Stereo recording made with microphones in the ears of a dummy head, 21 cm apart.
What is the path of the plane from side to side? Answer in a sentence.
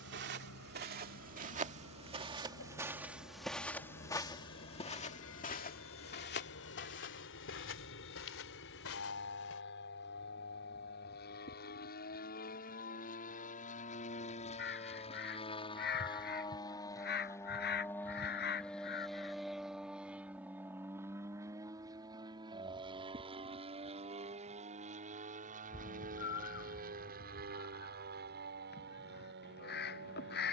You can hear the plane travel towards the right.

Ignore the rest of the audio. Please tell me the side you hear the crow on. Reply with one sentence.
You can hear the crow on the left.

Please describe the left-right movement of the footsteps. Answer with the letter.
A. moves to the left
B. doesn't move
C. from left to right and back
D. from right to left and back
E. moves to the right
A.